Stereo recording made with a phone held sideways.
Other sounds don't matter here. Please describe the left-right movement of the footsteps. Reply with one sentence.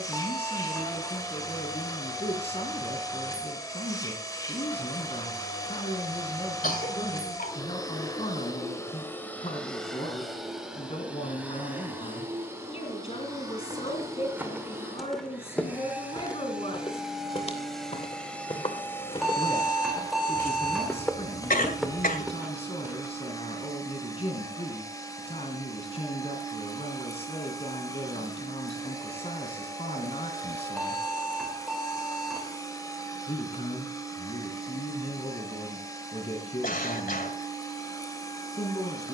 You can hear the footsteps move from right to left and back again.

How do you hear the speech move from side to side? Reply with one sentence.
You can hear the speech stay in one place.